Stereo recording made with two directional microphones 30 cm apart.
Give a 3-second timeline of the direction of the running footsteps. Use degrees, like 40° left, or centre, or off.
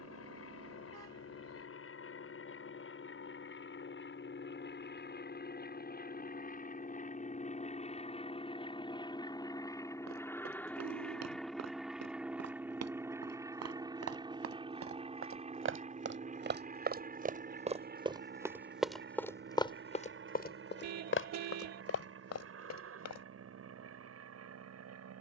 off, off, off, 60° right, 50° right, 30° right, 10° left, 50° left, off.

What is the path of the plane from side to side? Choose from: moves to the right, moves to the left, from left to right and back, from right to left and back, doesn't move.
moves to the right.